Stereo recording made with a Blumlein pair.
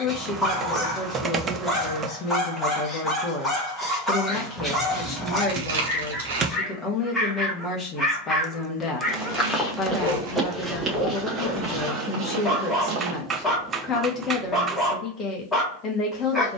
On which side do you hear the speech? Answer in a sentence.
You can hear the speech on the left.